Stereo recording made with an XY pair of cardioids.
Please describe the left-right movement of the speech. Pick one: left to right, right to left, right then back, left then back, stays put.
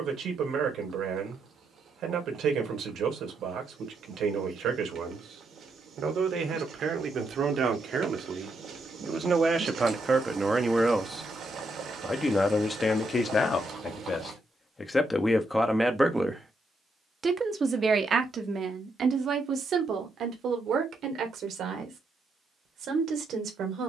left then back.